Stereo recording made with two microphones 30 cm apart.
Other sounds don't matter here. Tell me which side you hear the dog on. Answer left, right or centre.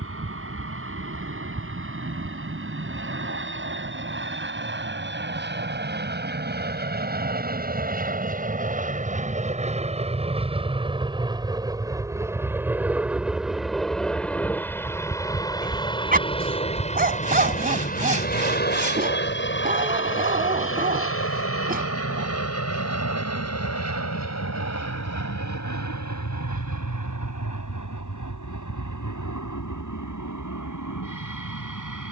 right.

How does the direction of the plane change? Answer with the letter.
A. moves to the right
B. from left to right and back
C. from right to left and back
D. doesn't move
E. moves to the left
E.